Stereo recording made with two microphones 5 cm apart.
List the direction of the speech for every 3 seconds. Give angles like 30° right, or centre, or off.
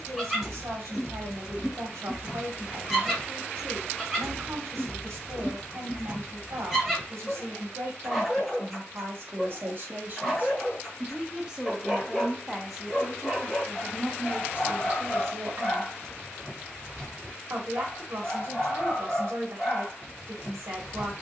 70° right, 70° right, 70° right, 40° right, 10° right, 60° right, 70° right.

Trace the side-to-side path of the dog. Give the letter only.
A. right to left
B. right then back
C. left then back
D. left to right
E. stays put
E.